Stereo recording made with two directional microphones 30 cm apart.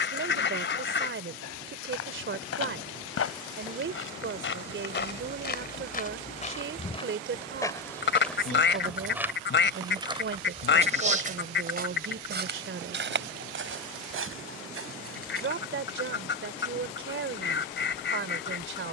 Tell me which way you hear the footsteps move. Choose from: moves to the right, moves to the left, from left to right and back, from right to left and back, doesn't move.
moves to the right.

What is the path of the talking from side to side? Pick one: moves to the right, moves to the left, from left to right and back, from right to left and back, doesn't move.
doesn't move.